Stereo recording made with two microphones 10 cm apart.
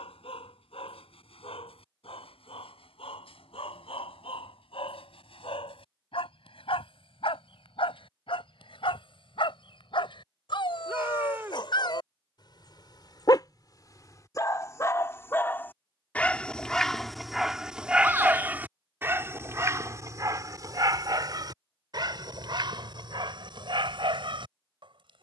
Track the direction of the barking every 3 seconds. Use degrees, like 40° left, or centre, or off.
80° left, 70° left, 70° left, 60° left, 40° left, 10° left, 30° right, 50° right, 60° right.